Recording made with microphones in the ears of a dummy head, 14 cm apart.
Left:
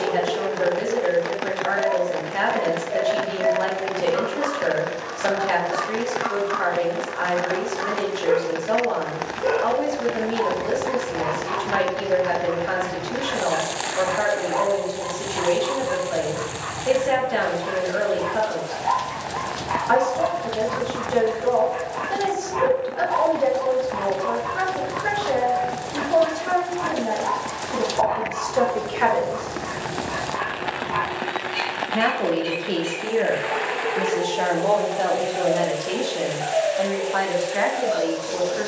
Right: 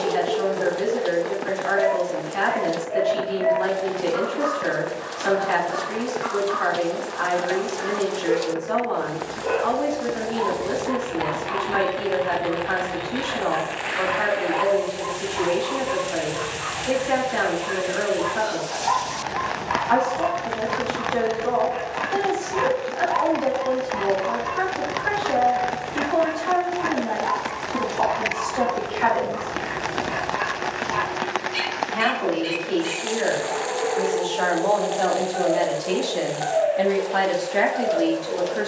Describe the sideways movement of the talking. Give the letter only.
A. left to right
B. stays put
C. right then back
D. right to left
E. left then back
A.